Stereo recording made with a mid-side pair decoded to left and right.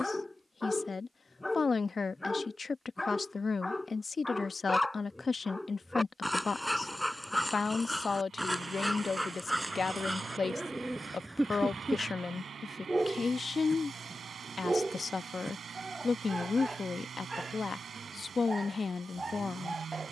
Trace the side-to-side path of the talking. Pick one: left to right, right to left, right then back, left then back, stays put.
stays put.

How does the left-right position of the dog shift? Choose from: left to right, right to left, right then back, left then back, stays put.
left to right.